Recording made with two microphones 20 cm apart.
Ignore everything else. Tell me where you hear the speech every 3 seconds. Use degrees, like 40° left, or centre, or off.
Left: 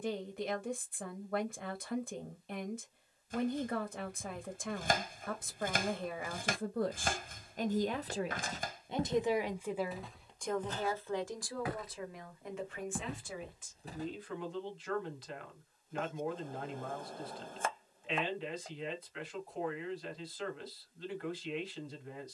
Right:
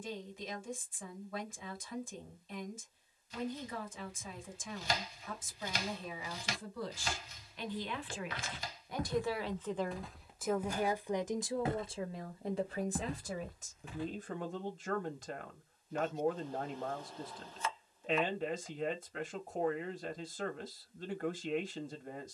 60° left, 60° left, 50° left, centre, 40° right, 50° right, 50° right, 50° right.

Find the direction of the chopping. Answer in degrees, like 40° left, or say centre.
50° left.